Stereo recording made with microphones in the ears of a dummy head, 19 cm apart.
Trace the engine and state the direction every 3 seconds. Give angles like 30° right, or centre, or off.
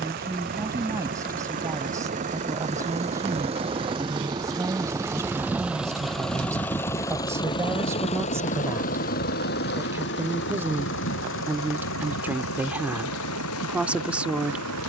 40° right, 20° right, 20° left, 60° left, 80° left.